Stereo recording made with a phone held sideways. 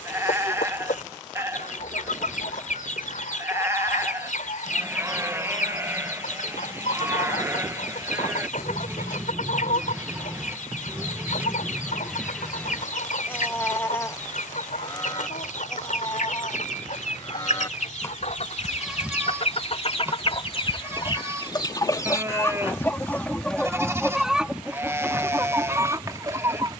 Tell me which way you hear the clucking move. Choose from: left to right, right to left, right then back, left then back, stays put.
left to right.